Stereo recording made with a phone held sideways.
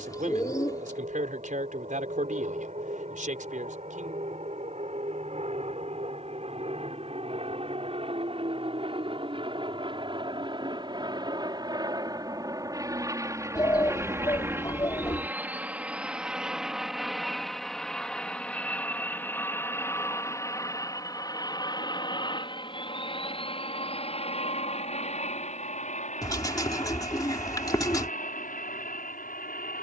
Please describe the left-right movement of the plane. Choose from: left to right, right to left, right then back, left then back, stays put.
right to left.